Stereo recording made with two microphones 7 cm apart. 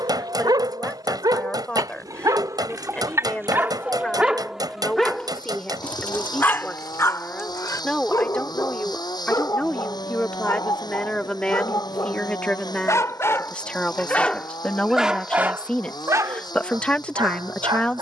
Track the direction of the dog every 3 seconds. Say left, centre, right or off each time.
right, centre, left, left, left, right.